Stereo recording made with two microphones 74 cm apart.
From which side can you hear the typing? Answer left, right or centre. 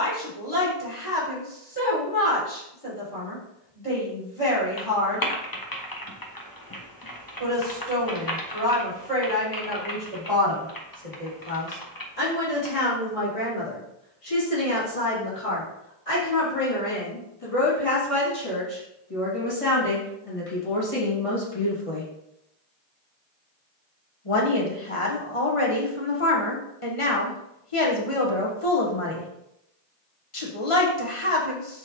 left.